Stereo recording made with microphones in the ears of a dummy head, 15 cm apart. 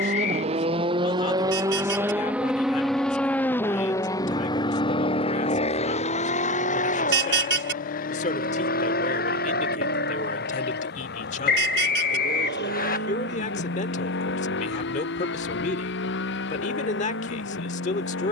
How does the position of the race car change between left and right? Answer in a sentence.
In this clip you hear the race car travel towards the left.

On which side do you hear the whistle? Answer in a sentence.
In this clip you hear the whistle on the left.